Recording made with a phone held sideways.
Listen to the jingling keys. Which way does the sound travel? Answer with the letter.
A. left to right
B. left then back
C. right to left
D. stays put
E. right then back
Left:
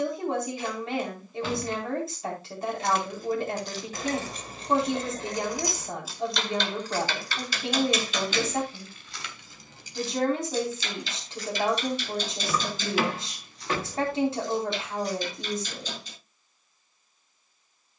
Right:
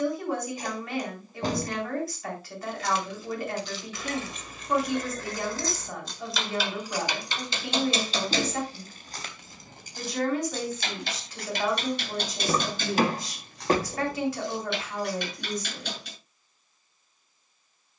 A.